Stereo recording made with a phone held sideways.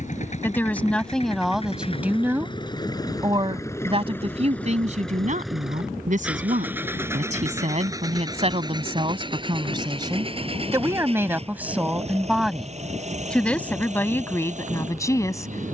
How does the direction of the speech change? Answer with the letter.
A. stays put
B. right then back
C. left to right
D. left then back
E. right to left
B.